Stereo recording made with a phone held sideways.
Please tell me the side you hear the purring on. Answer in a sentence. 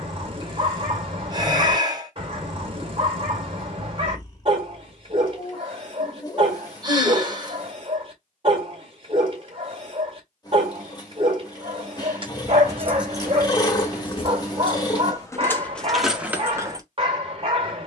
You can hear the purring on the left.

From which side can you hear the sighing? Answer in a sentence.
In this clip you hear the sighing on the right.